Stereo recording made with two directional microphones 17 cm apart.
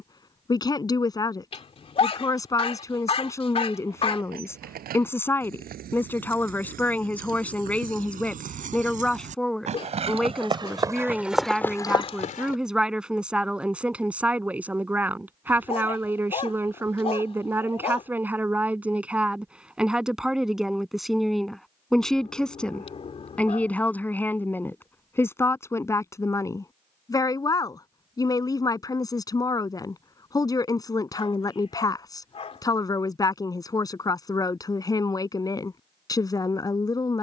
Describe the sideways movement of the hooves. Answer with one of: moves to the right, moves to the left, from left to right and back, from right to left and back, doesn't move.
moves to the left.